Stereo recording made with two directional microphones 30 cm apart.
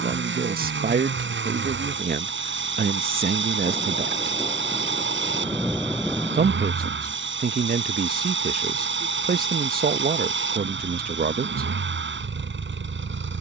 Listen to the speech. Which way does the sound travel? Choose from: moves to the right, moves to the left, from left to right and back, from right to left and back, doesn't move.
doesn't move.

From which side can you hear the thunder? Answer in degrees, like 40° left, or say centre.
centre.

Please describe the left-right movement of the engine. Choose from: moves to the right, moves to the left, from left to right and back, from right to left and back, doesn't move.
doesn't move.